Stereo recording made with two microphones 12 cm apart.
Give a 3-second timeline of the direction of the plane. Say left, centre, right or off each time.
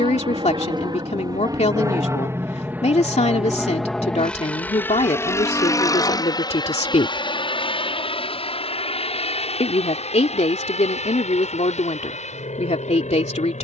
right, centre, left, left, left.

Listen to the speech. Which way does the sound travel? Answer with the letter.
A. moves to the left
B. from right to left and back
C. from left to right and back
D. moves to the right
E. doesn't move
E.